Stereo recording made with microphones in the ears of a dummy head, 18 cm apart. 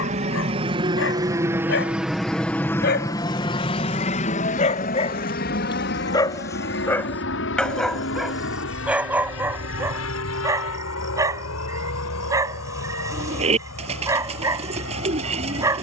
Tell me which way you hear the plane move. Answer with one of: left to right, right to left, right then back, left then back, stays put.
right to left.